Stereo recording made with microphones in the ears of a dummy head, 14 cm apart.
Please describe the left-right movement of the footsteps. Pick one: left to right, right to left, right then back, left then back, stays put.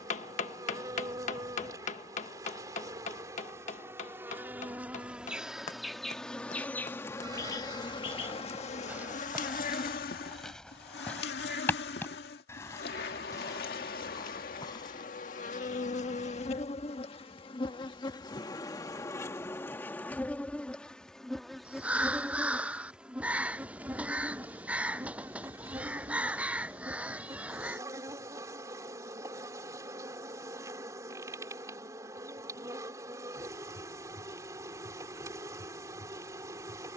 right to left.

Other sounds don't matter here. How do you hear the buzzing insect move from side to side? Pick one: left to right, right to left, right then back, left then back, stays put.
left then back.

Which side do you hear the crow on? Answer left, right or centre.
centre.